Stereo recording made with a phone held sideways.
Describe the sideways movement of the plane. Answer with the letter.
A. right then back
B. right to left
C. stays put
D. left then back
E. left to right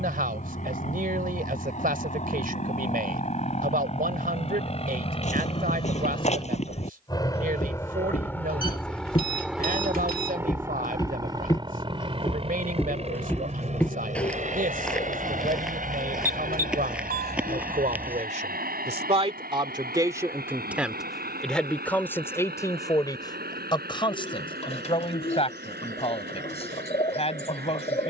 E.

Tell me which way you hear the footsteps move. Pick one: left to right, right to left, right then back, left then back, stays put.
left to right.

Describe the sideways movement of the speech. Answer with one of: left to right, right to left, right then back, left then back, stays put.
right to left.